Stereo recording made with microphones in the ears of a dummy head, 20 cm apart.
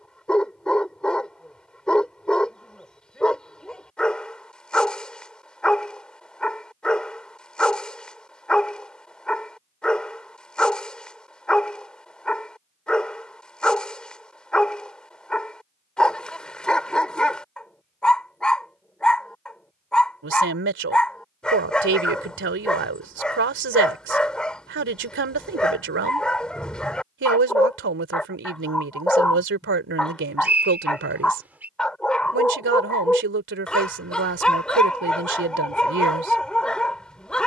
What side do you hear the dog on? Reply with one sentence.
You can hear the dog in the centre.